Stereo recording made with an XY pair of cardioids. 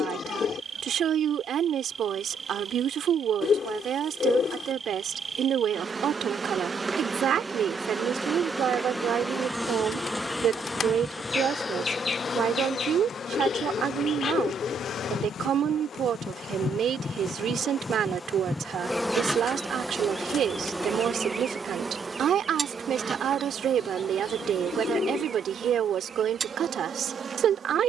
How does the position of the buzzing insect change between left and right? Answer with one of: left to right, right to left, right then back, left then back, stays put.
left then back.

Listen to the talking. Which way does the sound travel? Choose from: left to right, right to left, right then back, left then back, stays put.
stays put.